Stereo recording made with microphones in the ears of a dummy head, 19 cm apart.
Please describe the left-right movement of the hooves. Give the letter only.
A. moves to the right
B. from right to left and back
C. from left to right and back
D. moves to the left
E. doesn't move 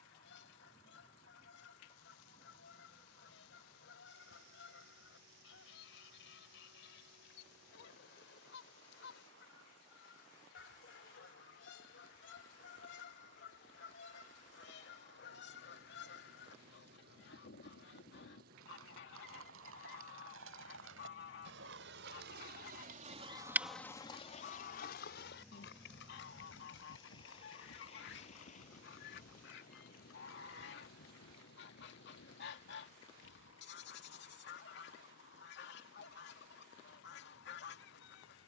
D.